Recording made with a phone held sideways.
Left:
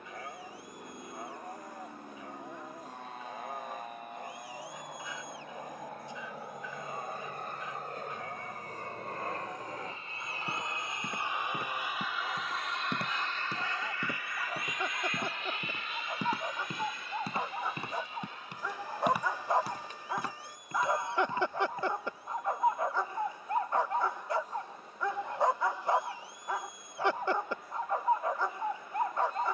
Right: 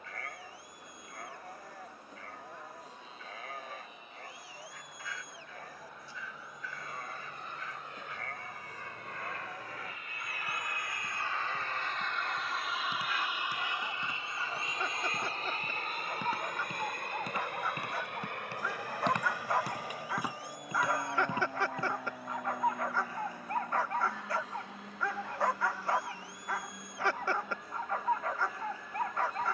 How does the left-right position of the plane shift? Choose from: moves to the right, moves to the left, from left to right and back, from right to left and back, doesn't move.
moves to the right.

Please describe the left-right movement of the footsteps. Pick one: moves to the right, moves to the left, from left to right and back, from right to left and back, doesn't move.
moves to the right.